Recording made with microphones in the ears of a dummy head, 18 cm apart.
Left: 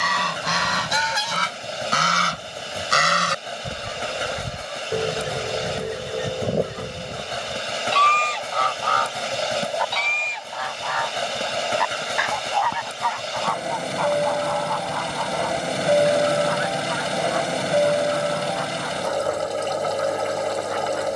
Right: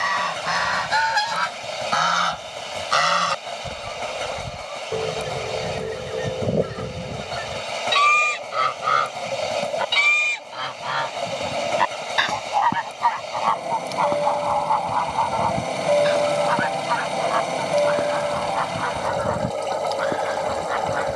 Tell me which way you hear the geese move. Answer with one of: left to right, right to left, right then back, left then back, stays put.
left to right.